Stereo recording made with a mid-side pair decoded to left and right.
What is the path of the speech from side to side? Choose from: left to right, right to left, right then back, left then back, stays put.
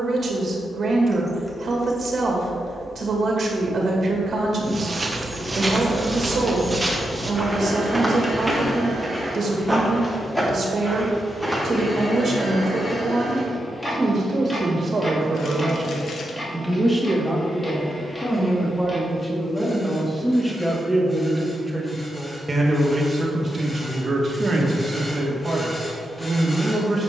left then back.